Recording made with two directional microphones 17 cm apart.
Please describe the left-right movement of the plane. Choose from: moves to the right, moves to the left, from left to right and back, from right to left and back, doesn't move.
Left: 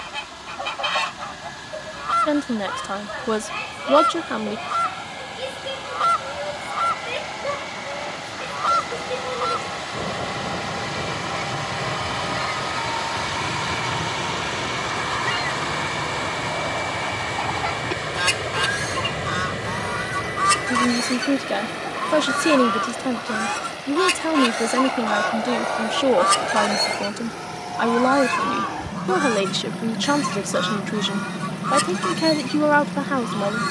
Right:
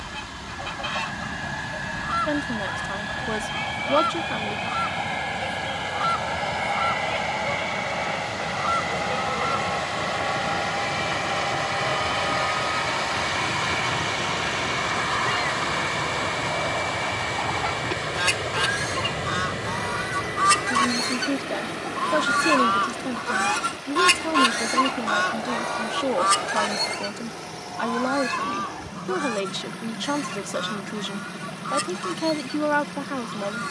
moves to the left.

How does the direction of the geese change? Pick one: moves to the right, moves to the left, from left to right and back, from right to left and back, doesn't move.
from left to right and back.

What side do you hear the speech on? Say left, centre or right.
left.